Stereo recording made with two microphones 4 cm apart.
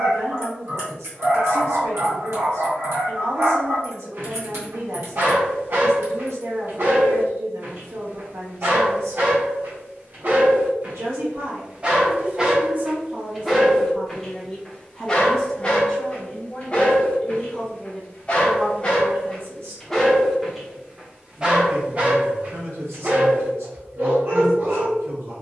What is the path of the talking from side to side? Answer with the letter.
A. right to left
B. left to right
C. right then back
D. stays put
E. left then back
E.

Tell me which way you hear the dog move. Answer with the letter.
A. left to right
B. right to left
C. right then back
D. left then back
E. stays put
D.